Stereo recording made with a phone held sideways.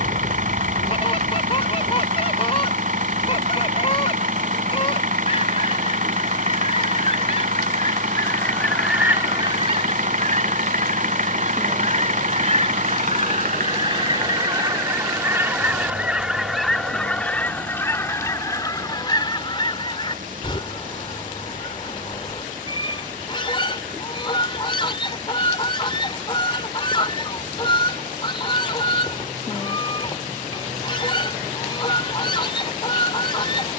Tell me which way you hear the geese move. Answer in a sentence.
In this clip you hear the geese move from left to right and back again.